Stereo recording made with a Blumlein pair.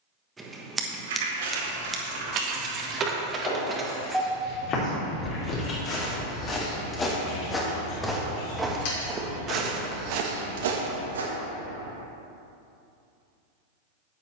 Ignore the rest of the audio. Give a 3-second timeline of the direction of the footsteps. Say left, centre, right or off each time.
off, left, centre, right, off.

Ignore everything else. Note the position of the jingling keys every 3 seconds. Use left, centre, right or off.
right, centre, left, left, off.